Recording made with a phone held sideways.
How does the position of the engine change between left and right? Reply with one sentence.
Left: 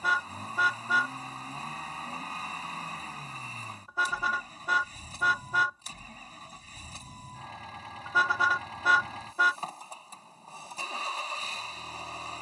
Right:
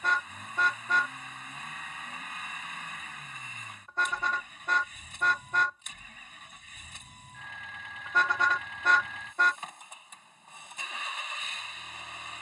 In this clip you hear the engine stay in one place.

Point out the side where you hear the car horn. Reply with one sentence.
In this clip you hear the car horn in the centre.